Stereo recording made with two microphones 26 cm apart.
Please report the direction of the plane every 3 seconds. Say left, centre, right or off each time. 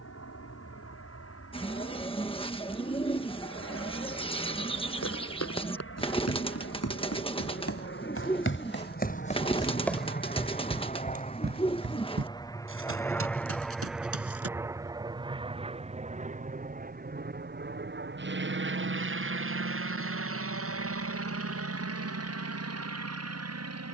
left, left, left, left, centre, right, right, right.